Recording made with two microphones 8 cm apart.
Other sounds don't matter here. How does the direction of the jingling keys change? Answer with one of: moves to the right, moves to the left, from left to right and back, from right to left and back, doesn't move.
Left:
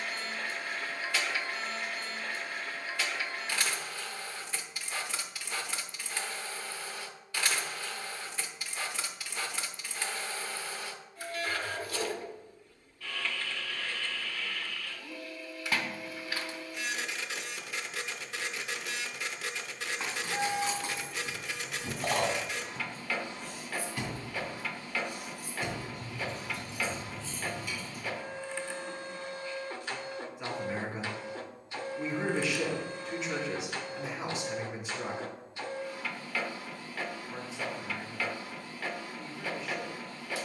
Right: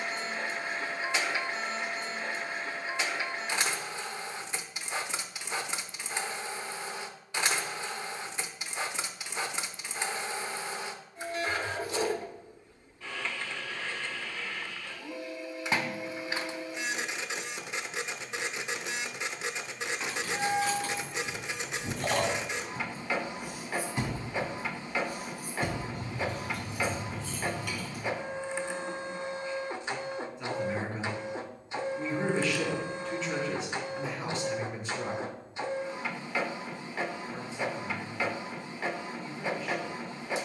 moves to the right.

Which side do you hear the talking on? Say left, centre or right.
centre.